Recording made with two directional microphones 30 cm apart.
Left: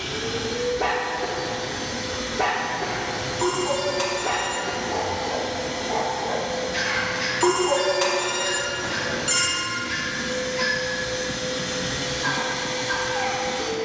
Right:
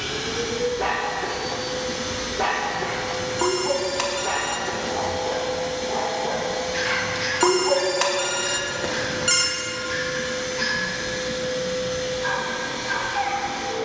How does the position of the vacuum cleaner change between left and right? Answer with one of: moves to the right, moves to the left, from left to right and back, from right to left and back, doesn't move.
moves to the left.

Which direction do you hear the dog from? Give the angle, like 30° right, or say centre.
centre.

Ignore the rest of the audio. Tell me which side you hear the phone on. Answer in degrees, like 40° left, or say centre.
30° right.